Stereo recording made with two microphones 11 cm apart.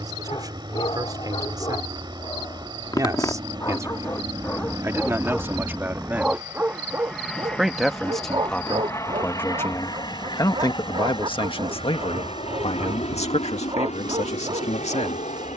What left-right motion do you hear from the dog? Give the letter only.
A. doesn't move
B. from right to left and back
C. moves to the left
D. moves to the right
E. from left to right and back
D.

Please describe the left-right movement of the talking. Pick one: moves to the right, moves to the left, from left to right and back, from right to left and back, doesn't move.
moves to the left.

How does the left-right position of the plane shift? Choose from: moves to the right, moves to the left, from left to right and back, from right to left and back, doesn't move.
moves to the left.